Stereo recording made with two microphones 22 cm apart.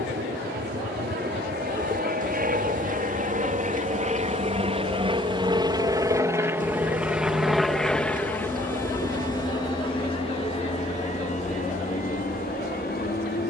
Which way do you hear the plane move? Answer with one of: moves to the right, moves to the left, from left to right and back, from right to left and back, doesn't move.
moves to the left.